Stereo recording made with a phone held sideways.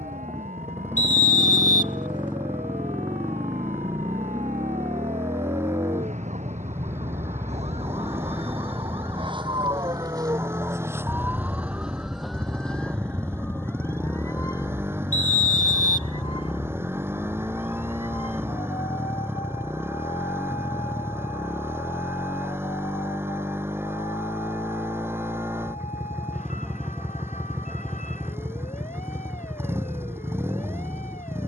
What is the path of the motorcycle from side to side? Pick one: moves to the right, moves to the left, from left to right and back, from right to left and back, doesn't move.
doesn't move.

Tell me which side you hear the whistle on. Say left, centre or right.
left.